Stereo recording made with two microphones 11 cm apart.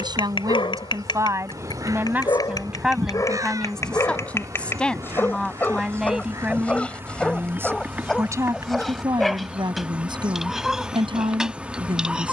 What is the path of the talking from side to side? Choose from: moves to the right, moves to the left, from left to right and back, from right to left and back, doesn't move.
from right to left and back.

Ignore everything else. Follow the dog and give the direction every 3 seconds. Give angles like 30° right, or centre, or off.
40° left, 20° left, 10° left, centre.